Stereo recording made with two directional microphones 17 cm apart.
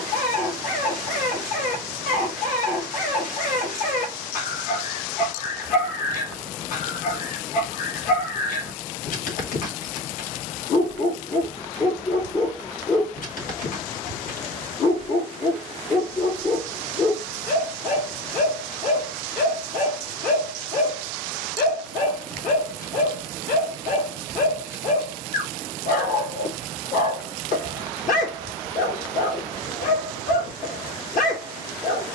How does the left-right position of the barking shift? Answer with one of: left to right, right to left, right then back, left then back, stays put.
stays put.